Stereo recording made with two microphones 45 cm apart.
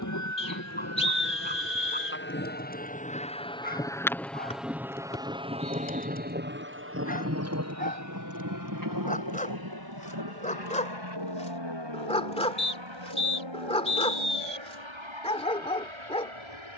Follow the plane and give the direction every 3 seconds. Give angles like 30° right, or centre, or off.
30° left, centre, 30° right, 50° right, 60° right, 70° right.